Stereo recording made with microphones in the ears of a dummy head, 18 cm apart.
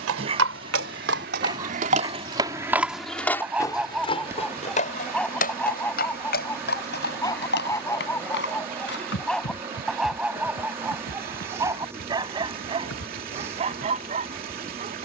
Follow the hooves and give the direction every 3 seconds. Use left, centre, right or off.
right, left, left, left, left.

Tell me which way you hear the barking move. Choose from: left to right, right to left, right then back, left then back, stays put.
left then back.